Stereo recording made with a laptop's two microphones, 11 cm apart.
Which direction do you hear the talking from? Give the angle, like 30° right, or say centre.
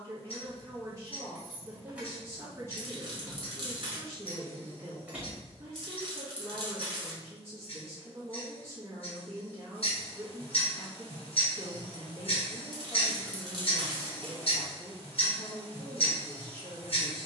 30° right.